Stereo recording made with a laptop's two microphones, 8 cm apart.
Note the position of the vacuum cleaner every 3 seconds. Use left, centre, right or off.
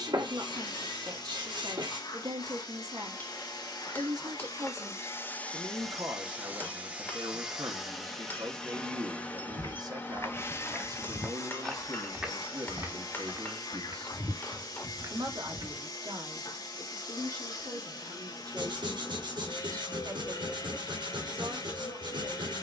left, left, centre, left, left, left, left, left.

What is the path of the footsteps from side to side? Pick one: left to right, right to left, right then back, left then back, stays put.
left to right.